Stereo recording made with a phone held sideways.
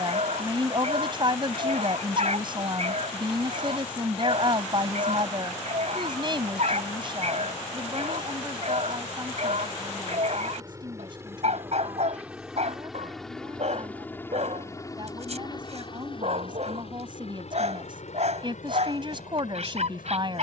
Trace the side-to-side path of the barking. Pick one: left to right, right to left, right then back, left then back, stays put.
stays put.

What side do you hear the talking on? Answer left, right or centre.
right.